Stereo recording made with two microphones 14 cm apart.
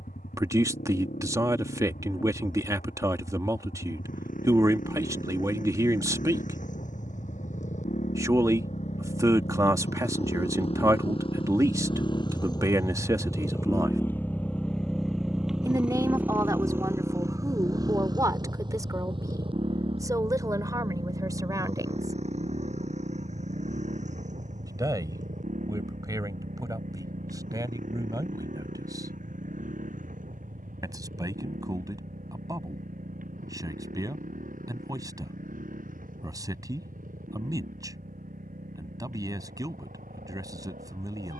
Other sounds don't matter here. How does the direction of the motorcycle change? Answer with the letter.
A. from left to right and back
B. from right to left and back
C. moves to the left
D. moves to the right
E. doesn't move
D.